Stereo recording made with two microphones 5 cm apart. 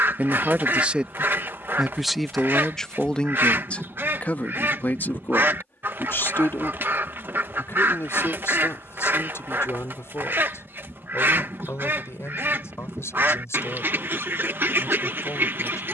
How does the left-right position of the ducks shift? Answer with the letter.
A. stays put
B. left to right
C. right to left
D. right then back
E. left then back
A.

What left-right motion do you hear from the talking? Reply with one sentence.
You can hear the talking travel towards the left.